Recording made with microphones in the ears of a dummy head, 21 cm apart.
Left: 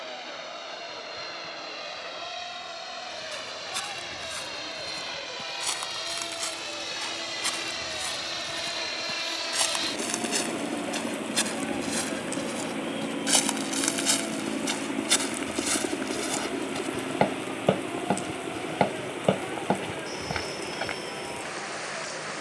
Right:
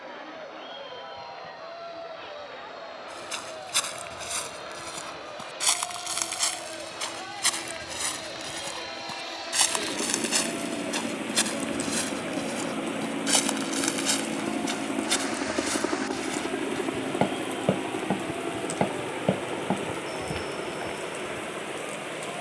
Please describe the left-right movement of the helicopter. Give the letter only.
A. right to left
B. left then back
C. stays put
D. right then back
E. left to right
E.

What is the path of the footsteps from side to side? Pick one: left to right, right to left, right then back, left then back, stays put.
right to left.